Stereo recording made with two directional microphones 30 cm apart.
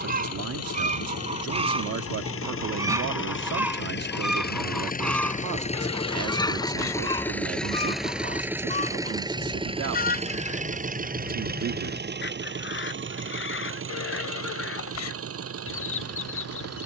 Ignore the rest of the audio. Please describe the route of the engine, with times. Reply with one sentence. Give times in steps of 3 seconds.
In this clip you hear the engine on the left from 0 s, in the centre from 6 s and on the right from 9 s.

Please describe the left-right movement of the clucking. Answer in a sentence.
You can hear the clucking move from right to left.